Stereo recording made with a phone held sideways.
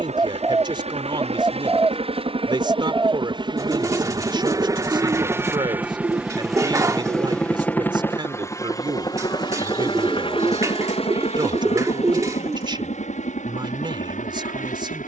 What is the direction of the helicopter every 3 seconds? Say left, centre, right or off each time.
right, right, centre, left, left.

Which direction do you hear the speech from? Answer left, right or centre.
right.